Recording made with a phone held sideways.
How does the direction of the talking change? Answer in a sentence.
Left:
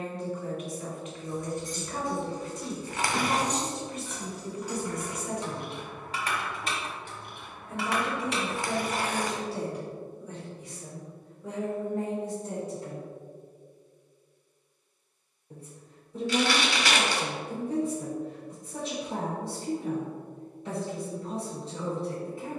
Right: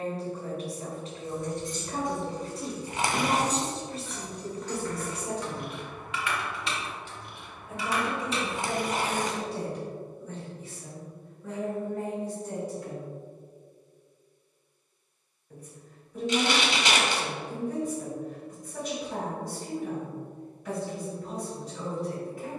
You can hear the talking move from right to left.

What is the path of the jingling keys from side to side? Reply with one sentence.
You can hear the jingling keys travel towards the left.